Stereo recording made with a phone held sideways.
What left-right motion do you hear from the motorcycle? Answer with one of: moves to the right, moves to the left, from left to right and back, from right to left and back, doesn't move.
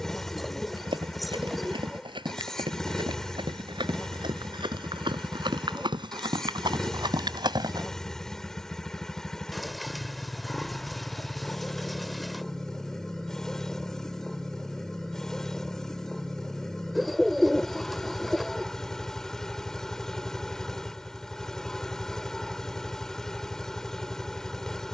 doesn't move.